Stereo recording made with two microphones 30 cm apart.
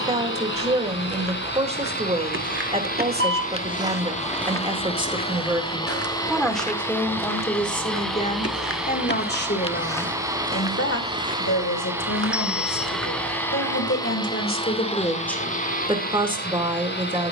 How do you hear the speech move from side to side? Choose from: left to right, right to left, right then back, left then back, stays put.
left then back.